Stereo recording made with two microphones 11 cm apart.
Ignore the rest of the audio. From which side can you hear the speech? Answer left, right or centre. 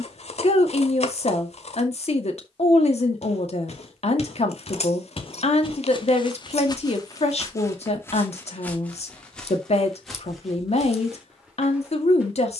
left.